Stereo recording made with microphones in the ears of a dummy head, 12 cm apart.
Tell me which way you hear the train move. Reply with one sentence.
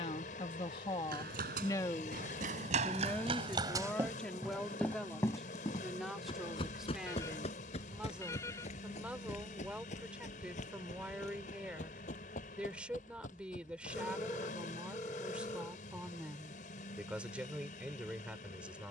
You can hear the train stay in one place.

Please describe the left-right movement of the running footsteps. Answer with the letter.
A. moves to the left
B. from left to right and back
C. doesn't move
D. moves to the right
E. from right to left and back
A.